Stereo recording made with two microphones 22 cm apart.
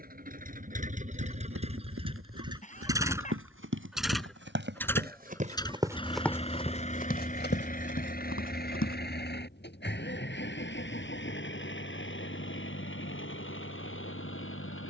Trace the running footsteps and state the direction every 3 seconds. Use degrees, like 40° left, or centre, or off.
80° right, 50° right, 50° left, off, off.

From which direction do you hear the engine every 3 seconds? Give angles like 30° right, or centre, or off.
30° right, centre, 40° left, 50° left, 60° left.